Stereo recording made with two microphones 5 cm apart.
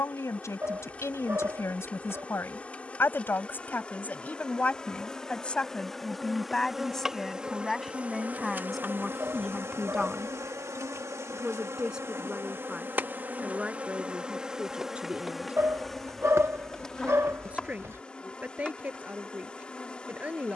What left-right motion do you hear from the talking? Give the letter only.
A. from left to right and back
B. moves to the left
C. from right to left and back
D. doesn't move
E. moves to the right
E.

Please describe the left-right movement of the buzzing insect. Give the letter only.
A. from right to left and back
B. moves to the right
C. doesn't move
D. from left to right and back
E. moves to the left
D.